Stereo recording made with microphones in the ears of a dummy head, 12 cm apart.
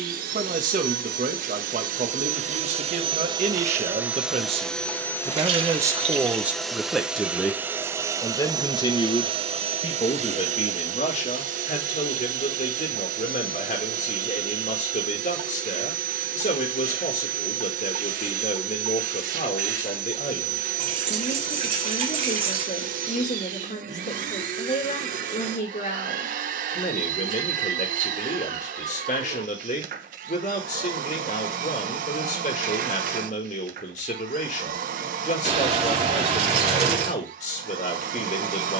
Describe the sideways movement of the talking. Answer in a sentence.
In this clip you hear the talking go from the right side to the left.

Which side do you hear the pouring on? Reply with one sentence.
You can hear the pouring on the right.